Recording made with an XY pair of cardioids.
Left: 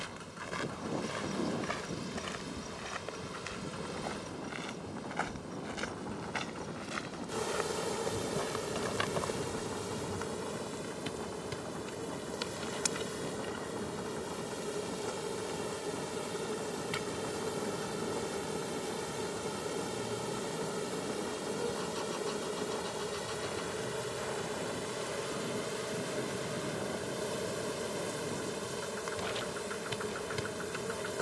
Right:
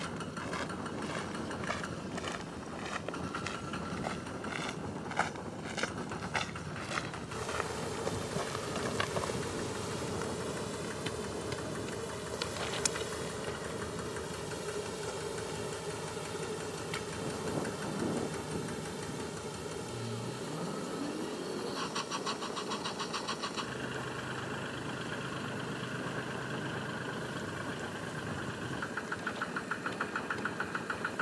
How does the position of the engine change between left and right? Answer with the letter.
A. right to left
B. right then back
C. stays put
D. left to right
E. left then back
C.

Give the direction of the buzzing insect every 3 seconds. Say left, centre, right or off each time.
left, left, left, centre, centre, centre, left, left, left, left, left.